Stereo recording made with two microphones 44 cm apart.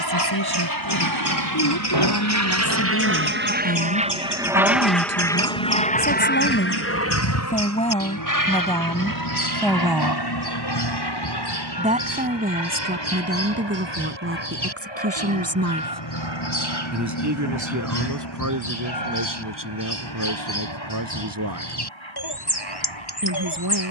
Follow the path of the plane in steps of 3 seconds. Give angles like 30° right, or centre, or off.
50° right, 10° right, 30° left, 50° left, 60° left, 70° left, 70° left, 70° left.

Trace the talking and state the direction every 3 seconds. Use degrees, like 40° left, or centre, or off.
50° left, 40° left, 20° left, centre, 20° right, 40° right, 50° right, 50° right.